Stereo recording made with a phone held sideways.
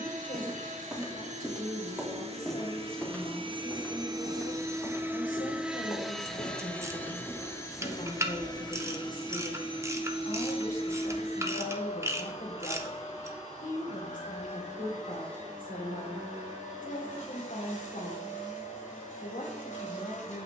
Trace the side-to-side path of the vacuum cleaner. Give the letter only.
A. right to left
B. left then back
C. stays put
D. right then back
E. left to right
A.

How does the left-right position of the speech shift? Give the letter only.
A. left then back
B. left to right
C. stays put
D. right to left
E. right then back
C.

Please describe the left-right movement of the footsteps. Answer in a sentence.
You can hear the footsteps travel towards the left.